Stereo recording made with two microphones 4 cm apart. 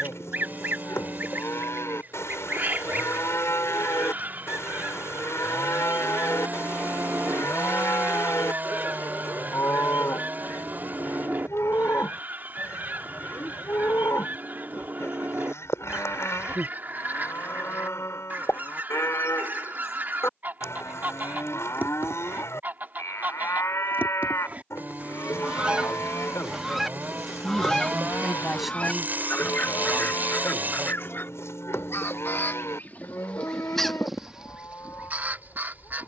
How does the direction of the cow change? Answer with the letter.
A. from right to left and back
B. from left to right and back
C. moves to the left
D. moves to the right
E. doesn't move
E.